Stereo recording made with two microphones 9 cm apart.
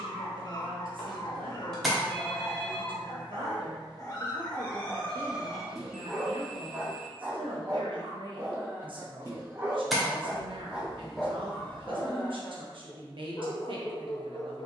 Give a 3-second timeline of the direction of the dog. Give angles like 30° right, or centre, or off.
50° left, 20° left, 30° right, 10° right, 40° left.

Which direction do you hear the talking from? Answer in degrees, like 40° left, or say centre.
60° right.